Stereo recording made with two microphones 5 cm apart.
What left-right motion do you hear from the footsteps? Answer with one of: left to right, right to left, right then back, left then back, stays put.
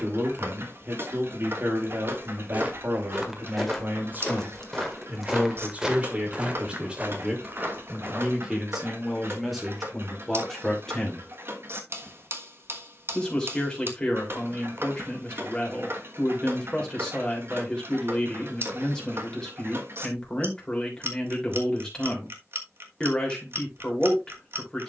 left then back.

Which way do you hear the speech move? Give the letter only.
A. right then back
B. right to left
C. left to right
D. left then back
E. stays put
B.